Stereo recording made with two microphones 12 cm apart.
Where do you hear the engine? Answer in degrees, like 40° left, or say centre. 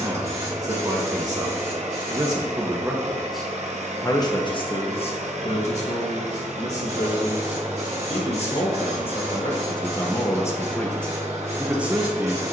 70° right.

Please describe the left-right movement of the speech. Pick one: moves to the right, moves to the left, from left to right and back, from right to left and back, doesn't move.
from right to left and back.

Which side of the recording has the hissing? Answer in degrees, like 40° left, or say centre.
60° right.